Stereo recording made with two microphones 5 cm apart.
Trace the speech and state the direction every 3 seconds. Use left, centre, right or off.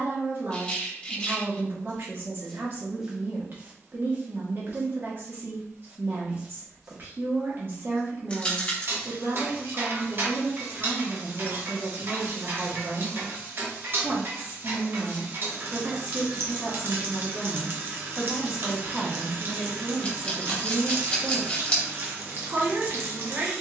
right, right, right, right, right, centre, right, right.